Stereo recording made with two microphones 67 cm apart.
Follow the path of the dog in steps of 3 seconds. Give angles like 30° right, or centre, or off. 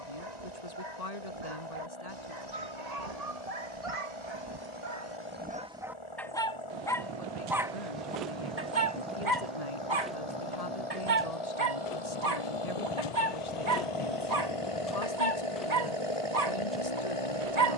80° right, 40° right, 10° right, 50° right, 70° right, 70° right.